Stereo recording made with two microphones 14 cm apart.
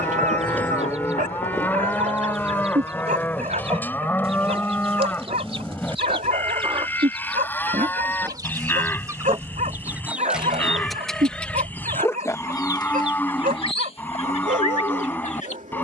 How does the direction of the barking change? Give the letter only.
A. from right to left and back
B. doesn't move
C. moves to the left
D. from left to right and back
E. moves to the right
B.